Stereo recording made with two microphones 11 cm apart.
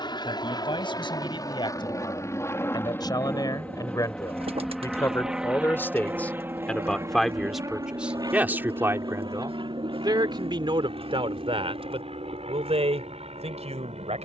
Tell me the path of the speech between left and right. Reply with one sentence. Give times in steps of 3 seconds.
You can hear the speech on the left from 0 s, in the centre from 6 s and on the right from 9 s.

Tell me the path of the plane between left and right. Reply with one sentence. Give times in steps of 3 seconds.
You can hear the plane on the left from 0 s, in the centre from 3 s and on the right from 6 s.